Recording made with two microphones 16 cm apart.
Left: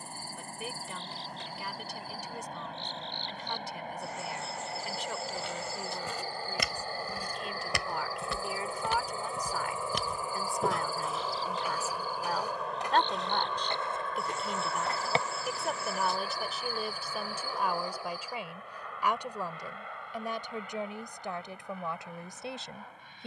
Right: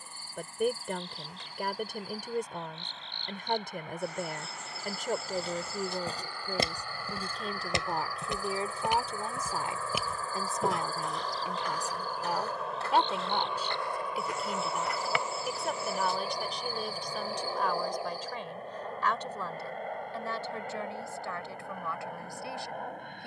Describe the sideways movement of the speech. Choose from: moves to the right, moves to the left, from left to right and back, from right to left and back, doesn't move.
moves to the left.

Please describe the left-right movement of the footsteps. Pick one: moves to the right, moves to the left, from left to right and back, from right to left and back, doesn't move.
moves to the left.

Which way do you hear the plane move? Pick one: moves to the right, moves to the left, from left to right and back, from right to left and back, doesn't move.
moves to the right.